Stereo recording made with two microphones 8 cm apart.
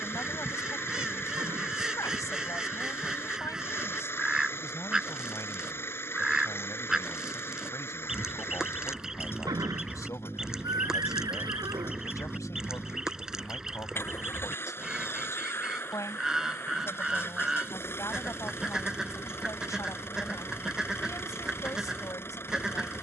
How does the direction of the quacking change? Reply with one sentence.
In this clip you hear the quacking stay in one place.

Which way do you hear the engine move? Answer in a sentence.
In this clip you hear the engine stay in one place.